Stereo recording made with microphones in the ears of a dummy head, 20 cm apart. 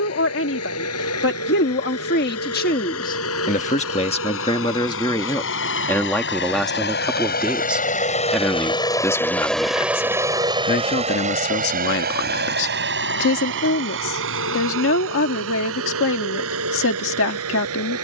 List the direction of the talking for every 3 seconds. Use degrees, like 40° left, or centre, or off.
50° left, 20° left, centre, 30° left, 60° left, 60° left.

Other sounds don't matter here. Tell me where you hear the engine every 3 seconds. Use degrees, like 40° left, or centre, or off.
70° left, 70° left, 40° left, 20° right, 60° right, 70° right.